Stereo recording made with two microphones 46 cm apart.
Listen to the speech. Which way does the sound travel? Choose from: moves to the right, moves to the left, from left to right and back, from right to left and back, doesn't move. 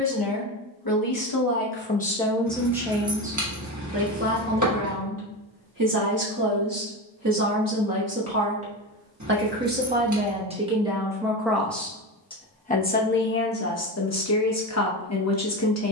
from left to right and back.